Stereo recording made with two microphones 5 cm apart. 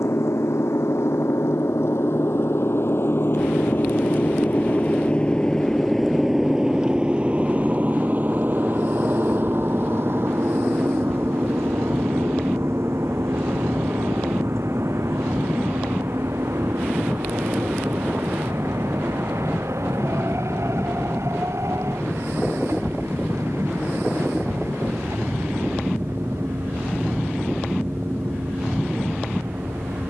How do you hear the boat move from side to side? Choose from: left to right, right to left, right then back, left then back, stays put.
left to right.